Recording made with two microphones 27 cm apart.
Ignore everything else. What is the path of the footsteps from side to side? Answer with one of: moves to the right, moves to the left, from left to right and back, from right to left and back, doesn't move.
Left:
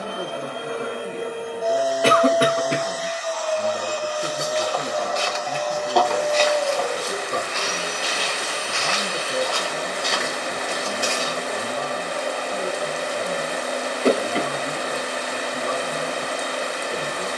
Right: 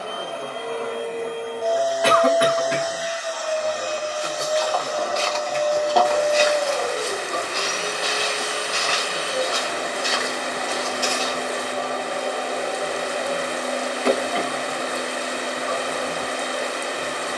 from left to right and back.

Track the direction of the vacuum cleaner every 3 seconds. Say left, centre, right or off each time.
centre, right, right, right, right, right.